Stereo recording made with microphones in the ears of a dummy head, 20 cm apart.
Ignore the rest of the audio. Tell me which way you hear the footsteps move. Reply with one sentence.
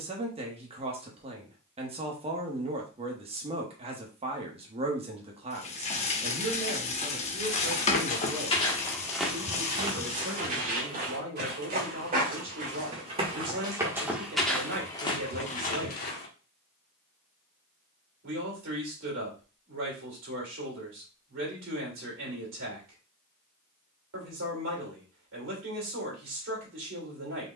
You can hear the footsteps go right and come back.